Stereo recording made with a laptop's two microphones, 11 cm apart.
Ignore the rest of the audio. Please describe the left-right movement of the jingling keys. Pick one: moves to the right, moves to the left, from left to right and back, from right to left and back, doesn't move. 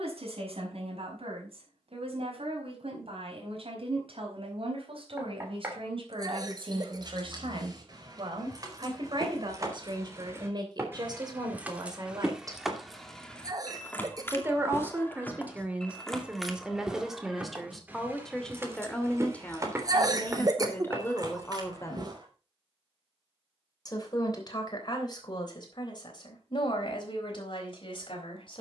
from right to left and back.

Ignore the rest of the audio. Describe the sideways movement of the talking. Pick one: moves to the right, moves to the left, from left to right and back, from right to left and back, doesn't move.
moves to the left.